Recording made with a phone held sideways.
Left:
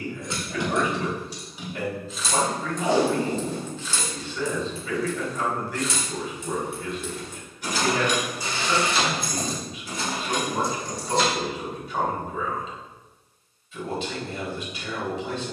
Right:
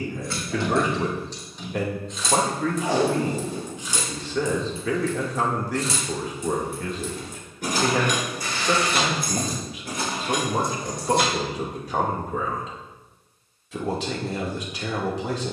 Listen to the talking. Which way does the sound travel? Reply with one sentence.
You can hear the talking stay in one place.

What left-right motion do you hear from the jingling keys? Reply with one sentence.
You can hear the jingling keys go from the left side to the right.